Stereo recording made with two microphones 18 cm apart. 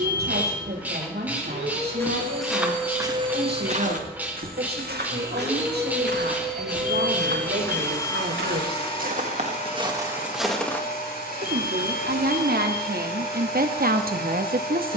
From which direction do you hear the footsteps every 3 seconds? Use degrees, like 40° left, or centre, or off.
centre, 50° right, 70° right, 20° right, off.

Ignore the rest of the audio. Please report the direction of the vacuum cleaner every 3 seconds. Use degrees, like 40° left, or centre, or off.
40° right, 20° right, 10° left, 50° left, 60° left.